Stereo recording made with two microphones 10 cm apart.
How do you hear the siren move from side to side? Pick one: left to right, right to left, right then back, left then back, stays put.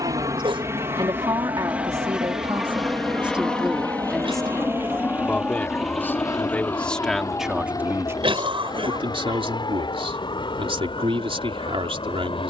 right to left.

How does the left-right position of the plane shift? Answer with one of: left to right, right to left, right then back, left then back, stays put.
right to left.